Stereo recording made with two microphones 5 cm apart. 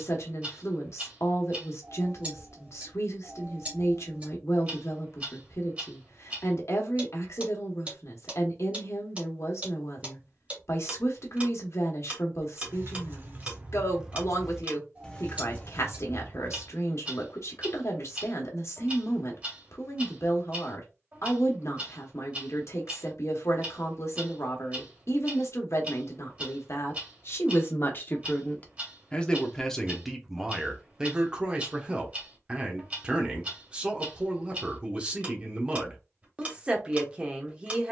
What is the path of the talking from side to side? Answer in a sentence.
You can hear the talking travel towards the right.